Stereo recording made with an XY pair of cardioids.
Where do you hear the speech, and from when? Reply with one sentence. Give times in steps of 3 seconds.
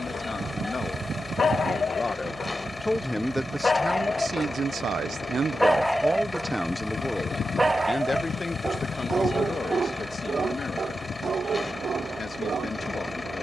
You can hear the speech on the left from 0 s, on the right from 3 s, in the centre from 6 s and on the left from 9 s.